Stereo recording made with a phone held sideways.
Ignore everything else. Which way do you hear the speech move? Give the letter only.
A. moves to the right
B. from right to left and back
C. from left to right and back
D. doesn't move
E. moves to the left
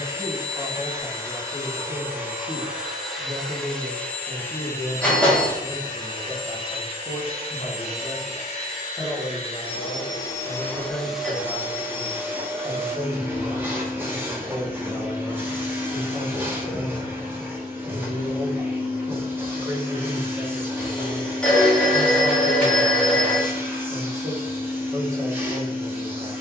B.